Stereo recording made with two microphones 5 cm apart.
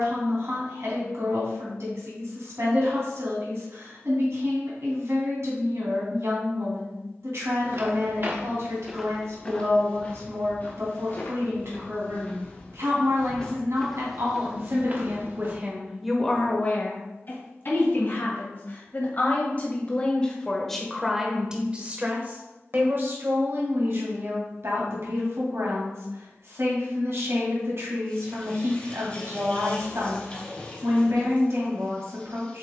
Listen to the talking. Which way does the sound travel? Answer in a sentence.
In this clip you hear the talking go left and come back.